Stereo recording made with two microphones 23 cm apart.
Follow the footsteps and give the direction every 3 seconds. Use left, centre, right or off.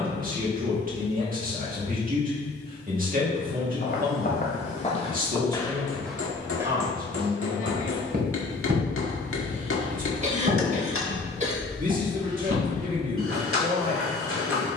off, left, right, right, right.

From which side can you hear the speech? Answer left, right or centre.
right.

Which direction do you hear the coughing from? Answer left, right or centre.
right.